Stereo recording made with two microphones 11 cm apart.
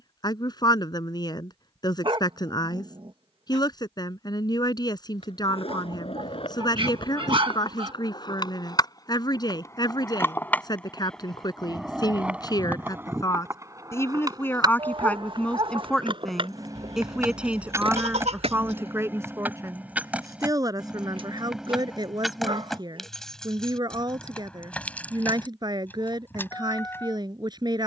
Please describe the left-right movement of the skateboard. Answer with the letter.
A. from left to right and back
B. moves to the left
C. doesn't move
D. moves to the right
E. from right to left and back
D.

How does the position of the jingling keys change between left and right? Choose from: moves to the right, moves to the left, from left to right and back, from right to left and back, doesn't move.
moves to the left.